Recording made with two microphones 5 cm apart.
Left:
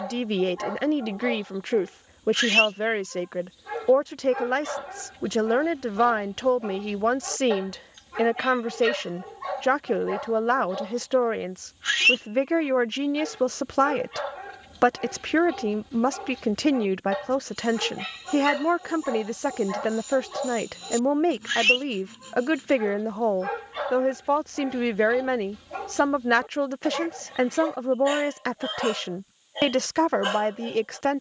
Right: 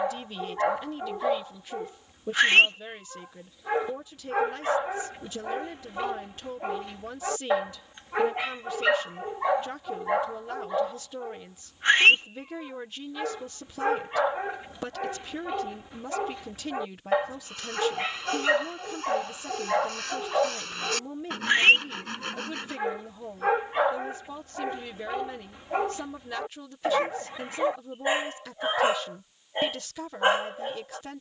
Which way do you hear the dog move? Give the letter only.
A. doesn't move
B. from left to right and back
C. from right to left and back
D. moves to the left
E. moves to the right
A.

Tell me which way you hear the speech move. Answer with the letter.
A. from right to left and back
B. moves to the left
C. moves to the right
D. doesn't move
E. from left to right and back
D.